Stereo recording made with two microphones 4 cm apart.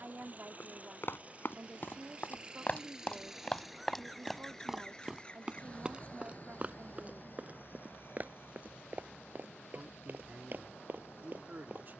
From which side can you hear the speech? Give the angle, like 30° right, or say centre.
50° right.